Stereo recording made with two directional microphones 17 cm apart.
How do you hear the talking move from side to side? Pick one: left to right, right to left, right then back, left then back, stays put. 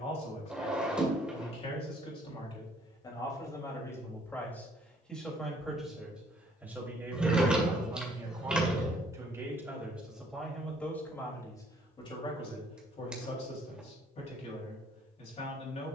right then back.